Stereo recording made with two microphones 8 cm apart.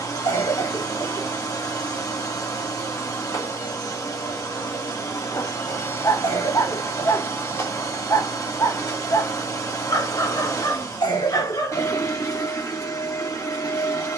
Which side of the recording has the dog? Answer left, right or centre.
left.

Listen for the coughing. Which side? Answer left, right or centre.
left.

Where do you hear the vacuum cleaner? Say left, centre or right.
left.